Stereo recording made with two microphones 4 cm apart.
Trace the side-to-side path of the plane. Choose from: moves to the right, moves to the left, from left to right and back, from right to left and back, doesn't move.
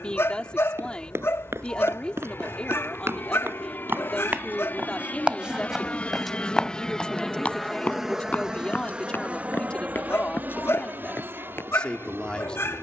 moves to the right.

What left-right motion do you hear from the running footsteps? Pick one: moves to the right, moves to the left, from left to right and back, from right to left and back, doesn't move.
moves to the left.